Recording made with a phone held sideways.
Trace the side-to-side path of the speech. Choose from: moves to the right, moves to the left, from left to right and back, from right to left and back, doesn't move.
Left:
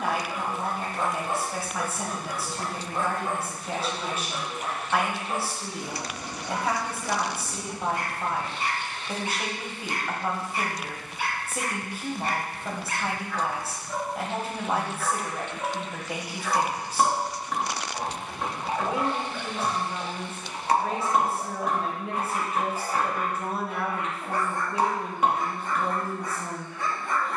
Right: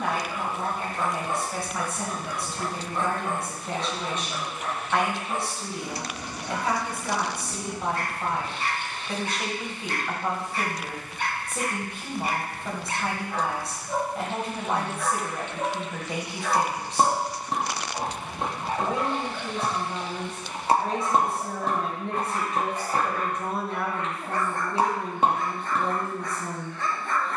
doesn't move.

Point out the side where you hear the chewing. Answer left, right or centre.
right.